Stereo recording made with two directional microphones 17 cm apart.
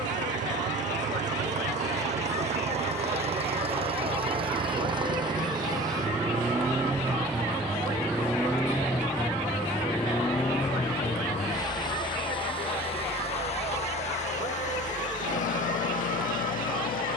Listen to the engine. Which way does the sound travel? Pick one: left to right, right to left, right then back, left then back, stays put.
right to left.